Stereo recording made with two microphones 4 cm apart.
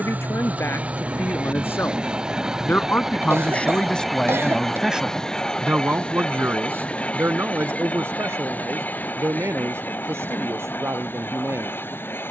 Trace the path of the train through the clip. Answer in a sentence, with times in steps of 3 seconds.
In this clip you hear the train on the right from 0 s, in the centre from 3 s and on the left from 6 s.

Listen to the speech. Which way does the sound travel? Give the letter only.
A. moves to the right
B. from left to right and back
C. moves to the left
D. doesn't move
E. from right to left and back
A.